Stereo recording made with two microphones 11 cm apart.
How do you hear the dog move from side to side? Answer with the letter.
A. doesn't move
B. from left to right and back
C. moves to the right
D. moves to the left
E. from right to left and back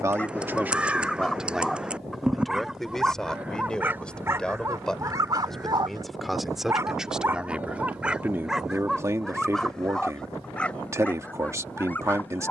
B.